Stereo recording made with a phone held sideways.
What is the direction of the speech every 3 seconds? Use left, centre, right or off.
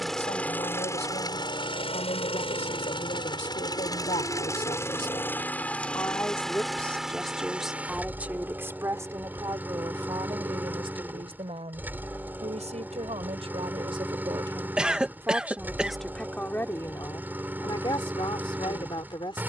left, left, centre, right, right, centre, left.